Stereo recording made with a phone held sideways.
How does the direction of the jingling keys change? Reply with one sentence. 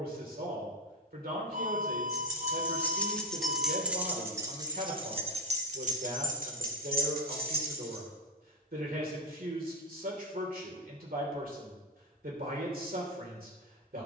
You can hear the jingling keys move from left to right.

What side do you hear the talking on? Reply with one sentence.
In this clip you hear the talking on the right.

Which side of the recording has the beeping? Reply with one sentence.
In this clip you hear the beeping on the right.